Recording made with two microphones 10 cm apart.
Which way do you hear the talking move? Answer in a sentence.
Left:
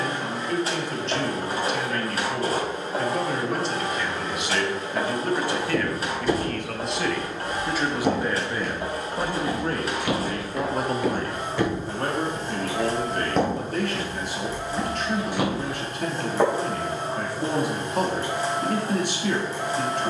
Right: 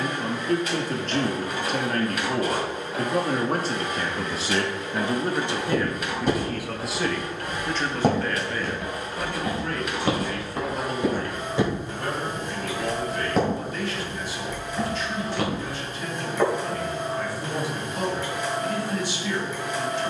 You can hear the talking move to the left.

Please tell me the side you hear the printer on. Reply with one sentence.
In this clip you hear the printer on the left.